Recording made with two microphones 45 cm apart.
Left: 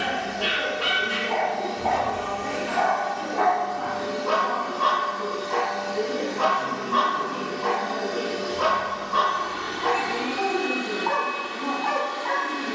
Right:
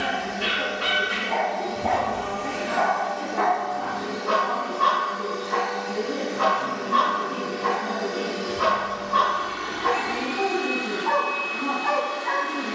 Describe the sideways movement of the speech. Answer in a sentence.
You can hear the speech stay put.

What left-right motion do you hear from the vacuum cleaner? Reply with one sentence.
In this clip you hear the vacuum cleaner go left and come back.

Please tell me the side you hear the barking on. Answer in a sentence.
You can hear the barking on the right.